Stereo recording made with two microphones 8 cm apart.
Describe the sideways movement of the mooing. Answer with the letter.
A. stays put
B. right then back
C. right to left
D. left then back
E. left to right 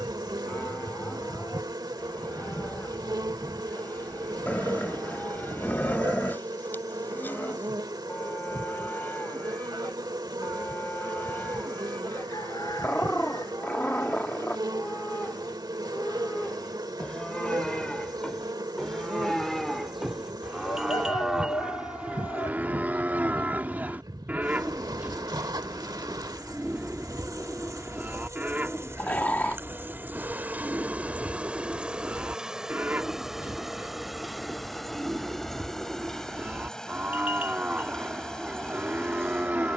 E.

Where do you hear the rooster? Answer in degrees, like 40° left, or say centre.
50° left.